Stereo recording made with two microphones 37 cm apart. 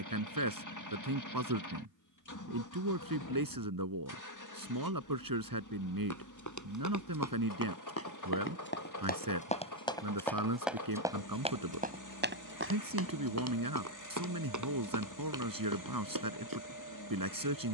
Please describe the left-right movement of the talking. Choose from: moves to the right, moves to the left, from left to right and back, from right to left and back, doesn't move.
doesn't move.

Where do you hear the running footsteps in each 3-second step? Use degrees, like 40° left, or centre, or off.
off, off, 40° left, centre, 40° right, 60° right.